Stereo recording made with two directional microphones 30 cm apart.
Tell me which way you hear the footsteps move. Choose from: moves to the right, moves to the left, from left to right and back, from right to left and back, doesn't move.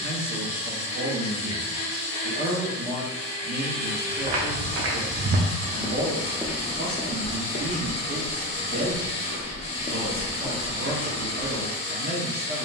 from right to left and back.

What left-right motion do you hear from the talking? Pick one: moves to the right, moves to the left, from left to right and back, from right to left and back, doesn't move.
doesn't move.